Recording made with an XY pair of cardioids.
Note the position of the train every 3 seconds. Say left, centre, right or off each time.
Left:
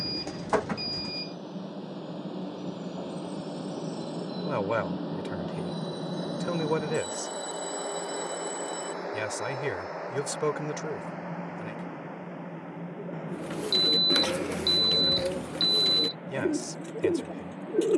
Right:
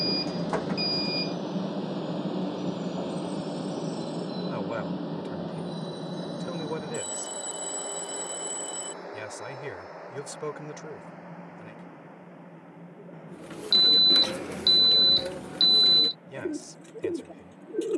right, centre, left, left, left, left.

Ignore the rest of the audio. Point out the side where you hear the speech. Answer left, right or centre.
left.